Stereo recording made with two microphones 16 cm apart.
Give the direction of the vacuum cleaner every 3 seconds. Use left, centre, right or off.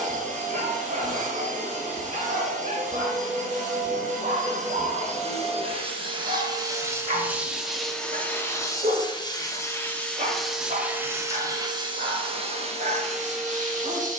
right, right, centre, centre, right.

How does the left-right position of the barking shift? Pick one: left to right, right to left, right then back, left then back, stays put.
stays put.